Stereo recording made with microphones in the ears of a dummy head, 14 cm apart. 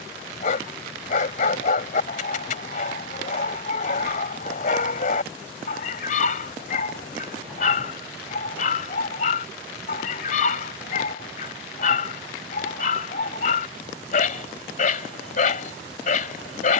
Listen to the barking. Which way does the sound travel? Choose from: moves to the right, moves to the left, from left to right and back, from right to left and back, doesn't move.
doesn't move.